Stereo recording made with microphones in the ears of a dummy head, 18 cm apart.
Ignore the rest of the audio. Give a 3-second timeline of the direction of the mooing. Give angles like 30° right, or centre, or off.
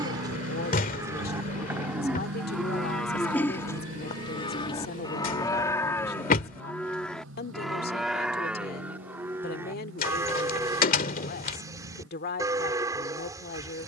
10° right, 20° left, centre, 20° right, 20° right.